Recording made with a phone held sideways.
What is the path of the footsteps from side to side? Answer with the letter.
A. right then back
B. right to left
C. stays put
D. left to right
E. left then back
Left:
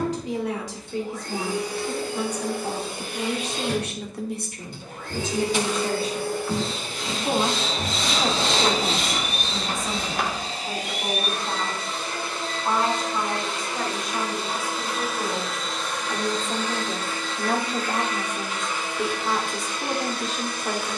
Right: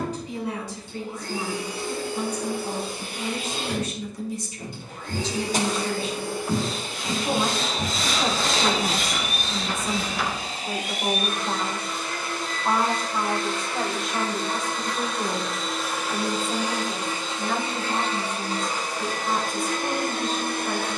B.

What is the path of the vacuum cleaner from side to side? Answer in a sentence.
In this clip you hear the vacuum cleaner move to the right.